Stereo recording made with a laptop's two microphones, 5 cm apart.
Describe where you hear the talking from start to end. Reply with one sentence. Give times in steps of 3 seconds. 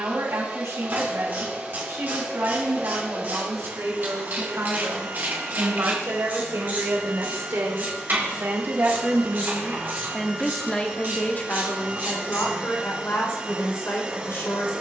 In this clip you hear the talking on the right from 0 s, in the centre from 9 s and on the left from 12 s.